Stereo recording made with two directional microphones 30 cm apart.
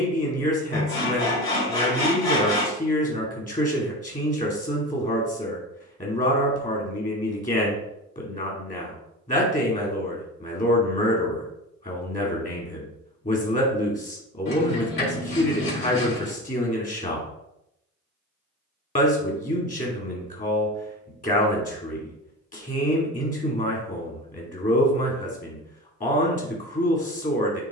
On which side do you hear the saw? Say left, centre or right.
left.